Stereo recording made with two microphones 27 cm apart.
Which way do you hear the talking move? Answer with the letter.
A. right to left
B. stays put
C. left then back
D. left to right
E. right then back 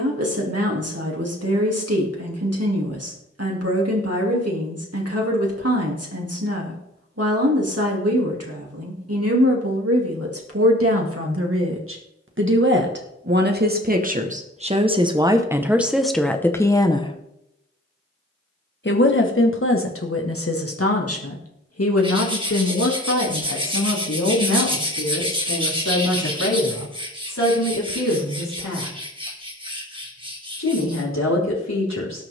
A.